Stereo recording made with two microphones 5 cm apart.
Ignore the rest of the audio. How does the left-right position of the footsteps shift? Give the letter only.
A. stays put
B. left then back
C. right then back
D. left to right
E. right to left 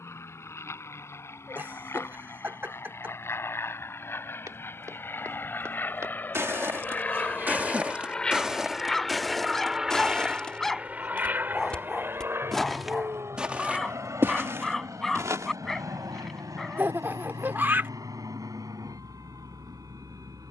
B.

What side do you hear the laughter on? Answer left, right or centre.
right.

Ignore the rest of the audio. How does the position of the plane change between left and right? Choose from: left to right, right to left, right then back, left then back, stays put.
left to right.